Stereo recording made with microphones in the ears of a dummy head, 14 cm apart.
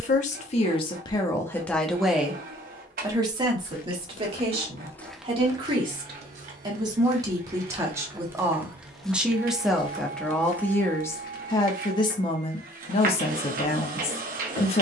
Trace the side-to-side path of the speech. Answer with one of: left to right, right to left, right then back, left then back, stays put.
right then back.